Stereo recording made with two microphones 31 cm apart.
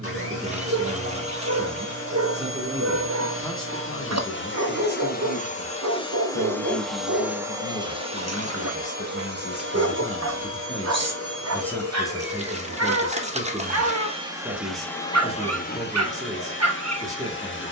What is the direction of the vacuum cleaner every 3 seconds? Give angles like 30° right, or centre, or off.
50° left, 40° left, 10° right, 50° right, 30° right, 40° left.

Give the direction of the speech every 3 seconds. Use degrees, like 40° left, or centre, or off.
20° right, 40° left, 50° left, 20° left, 10° right, 10° right.